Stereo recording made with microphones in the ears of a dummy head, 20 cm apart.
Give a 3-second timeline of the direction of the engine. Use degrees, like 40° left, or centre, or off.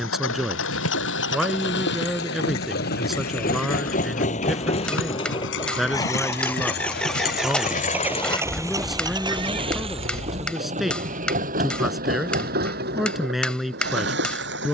50° left, 30° left, centre, 30° right, 50° right.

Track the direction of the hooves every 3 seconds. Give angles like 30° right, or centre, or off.
60° left, 60° left, 30° left, 40° right, off.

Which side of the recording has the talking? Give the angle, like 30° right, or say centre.
centre.